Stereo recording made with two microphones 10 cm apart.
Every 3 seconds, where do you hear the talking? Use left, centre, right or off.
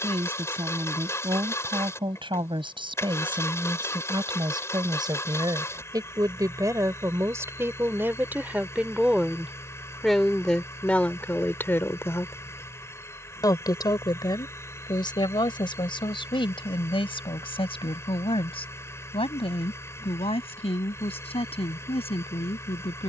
right, right, right, centre, left, left, left, left.